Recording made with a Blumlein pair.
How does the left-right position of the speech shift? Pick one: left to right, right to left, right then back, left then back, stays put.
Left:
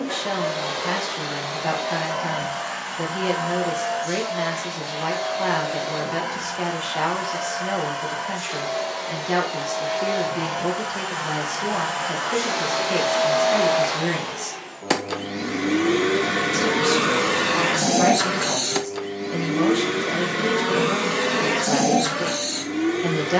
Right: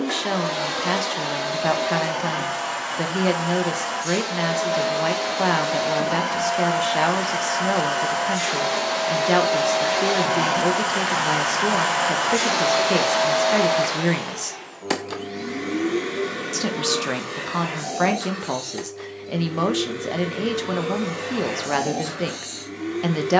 stays put.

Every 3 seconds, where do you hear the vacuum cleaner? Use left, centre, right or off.
right, right, right, right, centre, left, left, left.